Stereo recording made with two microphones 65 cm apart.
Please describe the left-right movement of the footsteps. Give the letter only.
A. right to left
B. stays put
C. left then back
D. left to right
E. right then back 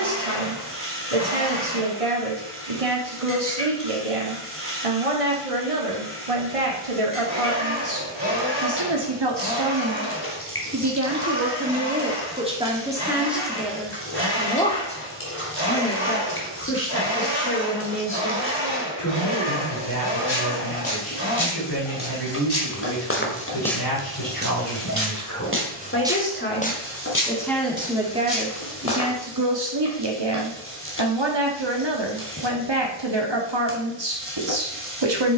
E.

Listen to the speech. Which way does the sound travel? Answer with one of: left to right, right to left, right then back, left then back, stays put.
left then back.